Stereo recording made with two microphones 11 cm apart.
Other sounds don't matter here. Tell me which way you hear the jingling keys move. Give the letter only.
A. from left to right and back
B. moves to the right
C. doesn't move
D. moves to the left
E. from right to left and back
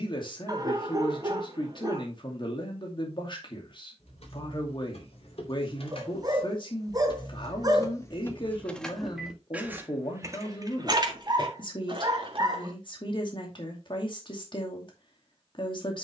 B.